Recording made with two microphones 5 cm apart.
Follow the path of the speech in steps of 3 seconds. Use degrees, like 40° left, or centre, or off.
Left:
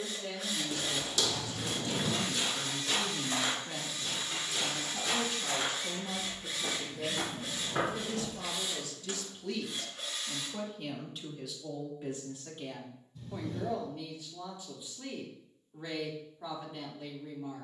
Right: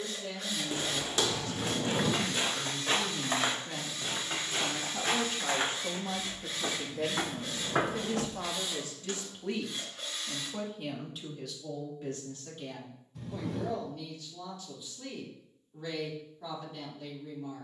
10° left, 20° right, 50° right, 10° right, 20° left, 20° left.